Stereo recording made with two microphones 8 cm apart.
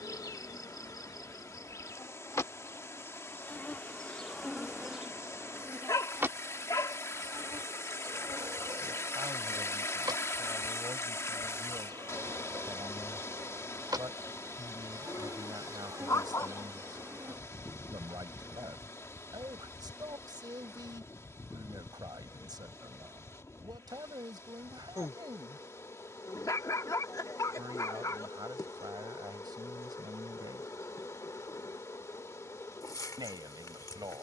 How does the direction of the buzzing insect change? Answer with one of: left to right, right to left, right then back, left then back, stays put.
right then back.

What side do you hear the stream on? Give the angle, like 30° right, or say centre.
40° left.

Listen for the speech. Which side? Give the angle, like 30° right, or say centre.
60° right.